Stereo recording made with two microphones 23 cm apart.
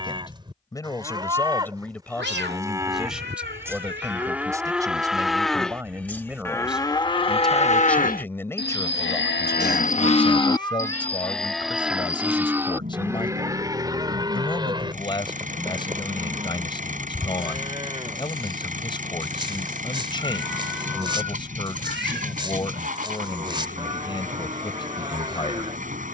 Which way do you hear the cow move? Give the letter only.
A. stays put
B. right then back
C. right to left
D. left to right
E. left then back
E.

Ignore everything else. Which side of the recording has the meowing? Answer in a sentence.
In this clip you hear the meowing on the right.